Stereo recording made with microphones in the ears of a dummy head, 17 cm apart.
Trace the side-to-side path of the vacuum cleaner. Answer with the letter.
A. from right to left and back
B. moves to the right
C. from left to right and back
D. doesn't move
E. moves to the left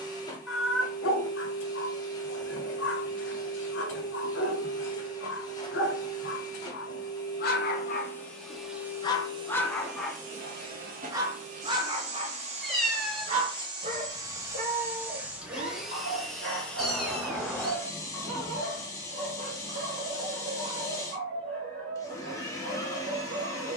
C.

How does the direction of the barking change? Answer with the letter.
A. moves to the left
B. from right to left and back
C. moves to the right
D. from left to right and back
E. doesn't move
C.